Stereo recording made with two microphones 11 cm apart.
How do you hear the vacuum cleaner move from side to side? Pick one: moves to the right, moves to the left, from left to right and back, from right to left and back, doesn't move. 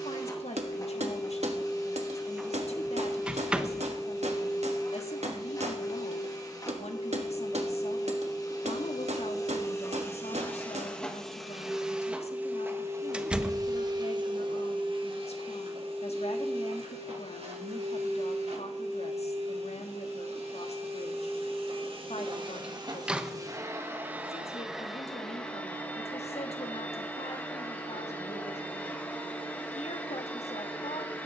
from left to right and back.